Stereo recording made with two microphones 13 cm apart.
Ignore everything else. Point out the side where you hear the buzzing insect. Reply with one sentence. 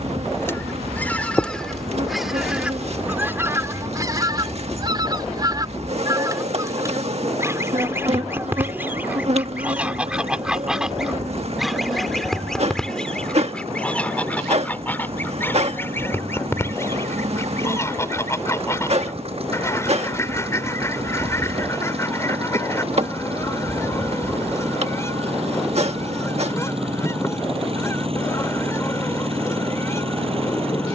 You can hear the buzzing insect on the right.